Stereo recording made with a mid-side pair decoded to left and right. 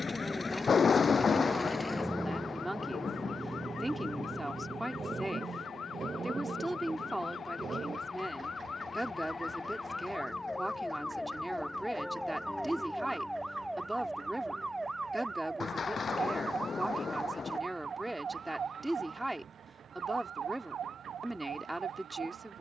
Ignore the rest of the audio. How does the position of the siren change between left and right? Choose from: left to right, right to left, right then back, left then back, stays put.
left to right.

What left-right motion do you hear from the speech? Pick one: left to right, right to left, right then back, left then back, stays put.
stays put.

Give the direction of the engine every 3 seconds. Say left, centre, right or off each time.
centre, right, right, right, right, right, right, right.